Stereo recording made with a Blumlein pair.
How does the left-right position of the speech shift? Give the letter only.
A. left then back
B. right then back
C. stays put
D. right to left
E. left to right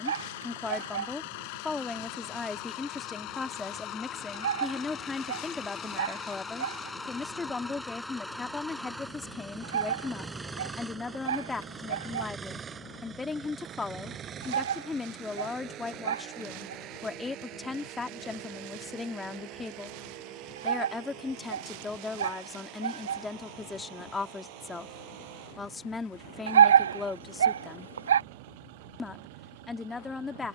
C.